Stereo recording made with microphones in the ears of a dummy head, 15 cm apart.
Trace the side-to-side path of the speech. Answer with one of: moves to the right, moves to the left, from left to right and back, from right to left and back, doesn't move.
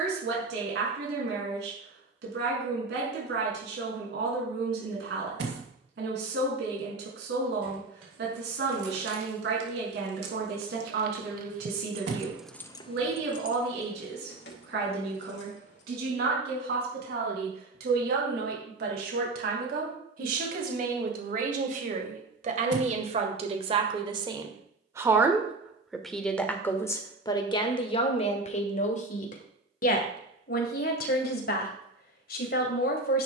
moves to the left.